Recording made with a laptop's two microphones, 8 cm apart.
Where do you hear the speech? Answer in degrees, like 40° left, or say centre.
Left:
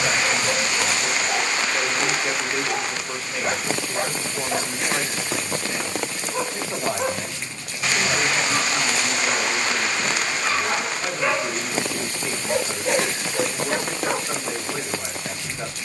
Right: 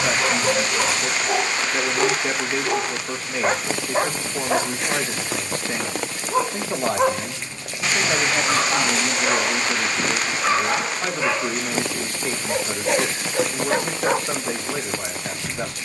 50° right.